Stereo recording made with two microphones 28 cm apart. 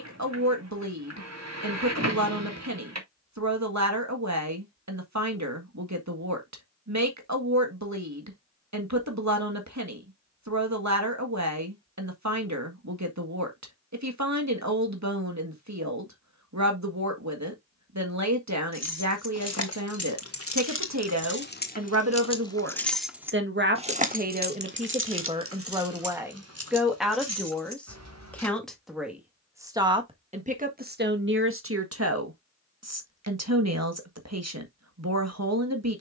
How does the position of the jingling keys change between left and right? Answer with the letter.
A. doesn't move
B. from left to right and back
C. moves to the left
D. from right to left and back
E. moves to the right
E.